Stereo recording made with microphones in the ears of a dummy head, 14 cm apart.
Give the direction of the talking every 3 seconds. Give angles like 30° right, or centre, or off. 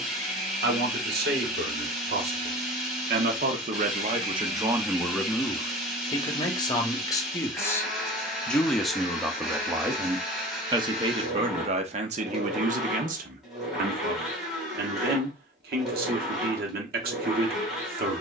70° right, 30° right, 20° left, 20° right, 60° right, 70° right.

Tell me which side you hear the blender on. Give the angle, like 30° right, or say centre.
centre.